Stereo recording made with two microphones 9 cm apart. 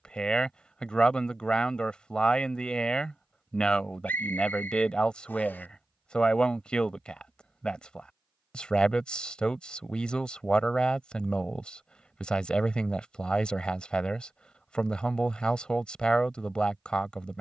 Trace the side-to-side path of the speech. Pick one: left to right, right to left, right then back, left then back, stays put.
stays put.